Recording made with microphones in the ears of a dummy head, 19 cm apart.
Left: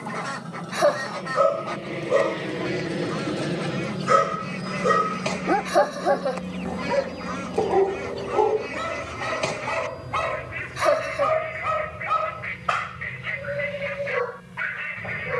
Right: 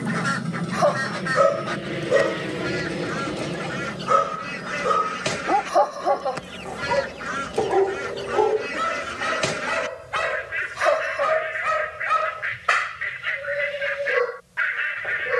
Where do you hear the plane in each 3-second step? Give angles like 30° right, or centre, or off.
20° right, 30° left, 50° left, 70° left, 70° left.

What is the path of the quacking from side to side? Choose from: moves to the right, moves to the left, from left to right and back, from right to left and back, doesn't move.
doesn't move.